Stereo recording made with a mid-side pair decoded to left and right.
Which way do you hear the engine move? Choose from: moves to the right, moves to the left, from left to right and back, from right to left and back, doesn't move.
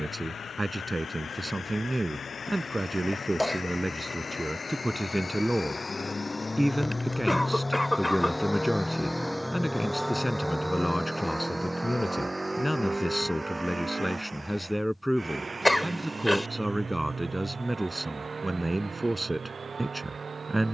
moves to the right.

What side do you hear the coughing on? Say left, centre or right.
centre.